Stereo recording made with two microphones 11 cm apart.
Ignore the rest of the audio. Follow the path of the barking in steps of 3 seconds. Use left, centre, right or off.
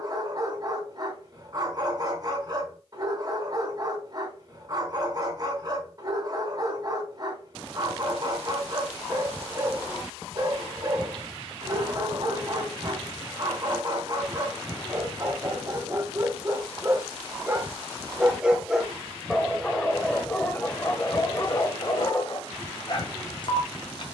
right, right, right, right, right, right, centre, left.